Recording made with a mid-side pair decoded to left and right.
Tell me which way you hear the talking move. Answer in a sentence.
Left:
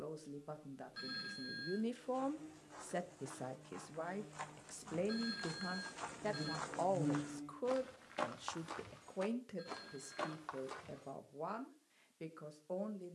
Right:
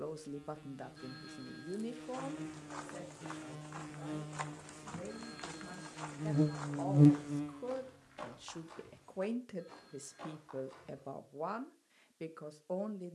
You can hear the talking go left and come back.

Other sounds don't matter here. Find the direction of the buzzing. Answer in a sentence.
You can hear the buzzing on the right.